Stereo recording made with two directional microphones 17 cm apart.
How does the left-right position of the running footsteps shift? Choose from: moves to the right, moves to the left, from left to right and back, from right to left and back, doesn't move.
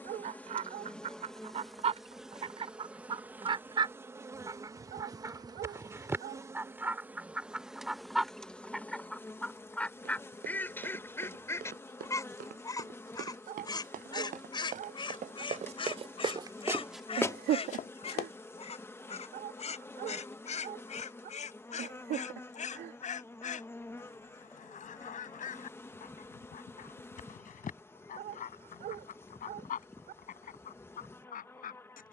moves to the left.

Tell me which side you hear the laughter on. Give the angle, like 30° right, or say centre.
70° right.